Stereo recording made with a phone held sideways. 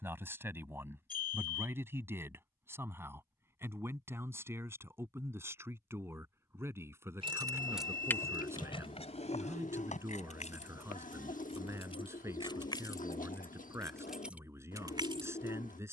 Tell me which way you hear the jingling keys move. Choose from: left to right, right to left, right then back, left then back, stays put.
left then back.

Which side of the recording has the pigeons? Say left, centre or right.
left.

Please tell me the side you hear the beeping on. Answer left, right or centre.
left.